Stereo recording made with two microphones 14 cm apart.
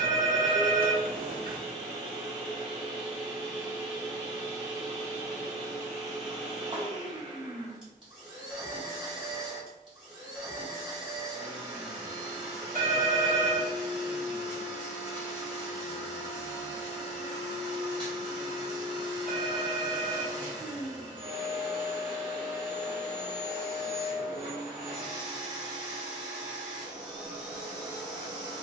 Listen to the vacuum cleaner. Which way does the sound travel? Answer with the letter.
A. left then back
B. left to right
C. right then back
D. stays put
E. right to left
D.